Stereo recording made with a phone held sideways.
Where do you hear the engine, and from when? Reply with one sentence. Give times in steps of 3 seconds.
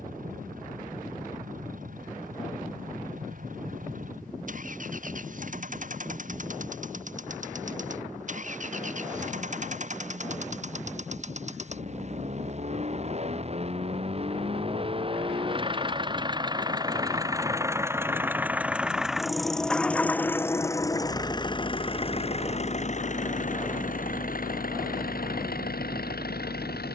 In this clip you hear the engine on the right from 0 s, in the centre from 18 s and on the left from 21 s.